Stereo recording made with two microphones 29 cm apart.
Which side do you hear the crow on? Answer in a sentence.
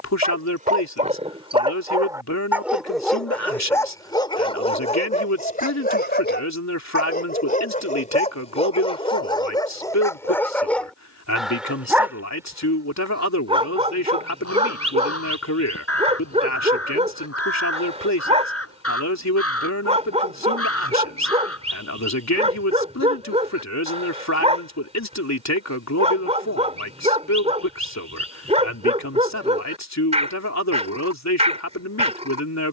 You can hear the crow on the left.